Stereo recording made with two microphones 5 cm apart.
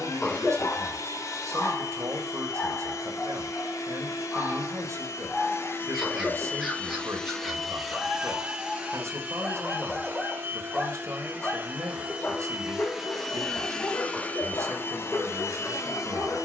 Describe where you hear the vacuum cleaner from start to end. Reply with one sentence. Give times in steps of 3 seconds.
In this clip you hear the vacuum cleaner on the left from 0 s, in the centre from 6 s, on the right from 9 s, in the centre from 12 s and on the left from 15 s.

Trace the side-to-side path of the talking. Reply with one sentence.
You can hear the talking stay in one place.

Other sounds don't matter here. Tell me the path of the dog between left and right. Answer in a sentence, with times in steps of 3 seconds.
You can hear the dog on the left from 0 s, in the centre from 3 s and on the left from 12 s.